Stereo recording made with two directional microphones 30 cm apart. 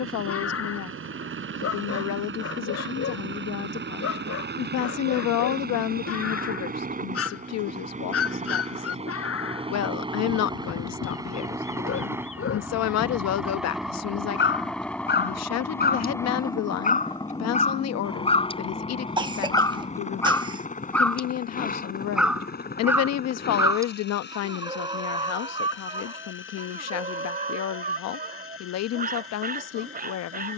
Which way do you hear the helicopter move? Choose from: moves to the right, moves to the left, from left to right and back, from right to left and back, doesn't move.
moves to the left.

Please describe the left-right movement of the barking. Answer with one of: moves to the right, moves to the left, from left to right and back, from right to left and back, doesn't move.
moves to the right.